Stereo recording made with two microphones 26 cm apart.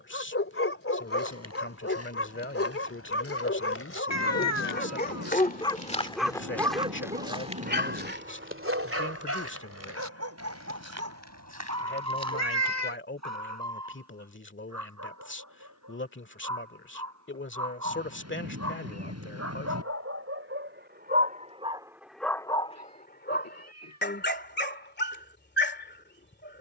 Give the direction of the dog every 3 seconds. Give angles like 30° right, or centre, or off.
50° left, 40° left, 30° right, 60° right, 70° right, 70° right, 60° right, centre, 40° left.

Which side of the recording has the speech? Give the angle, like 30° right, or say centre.
40° left.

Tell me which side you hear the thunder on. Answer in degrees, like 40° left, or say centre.
60° right.